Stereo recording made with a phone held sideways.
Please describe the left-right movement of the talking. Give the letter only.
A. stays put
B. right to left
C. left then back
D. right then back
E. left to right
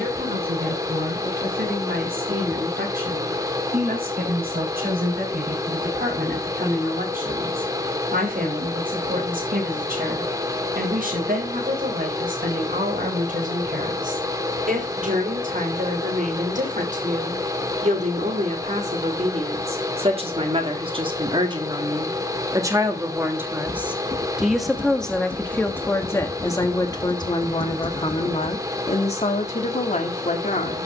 B.